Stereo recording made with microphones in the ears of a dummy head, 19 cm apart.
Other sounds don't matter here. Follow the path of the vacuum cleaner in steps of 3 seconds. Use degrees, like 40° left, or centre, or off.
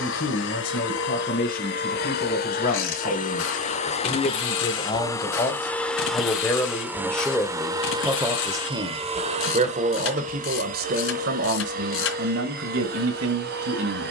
50° left, 20° left, 10° right, 40° right, 50° right.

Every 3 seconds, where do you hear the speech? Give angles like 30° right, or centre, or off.
40° left, 30° left, centre, 50° right, 70° right.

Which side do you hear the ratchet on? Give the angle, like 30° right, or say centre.
70° left.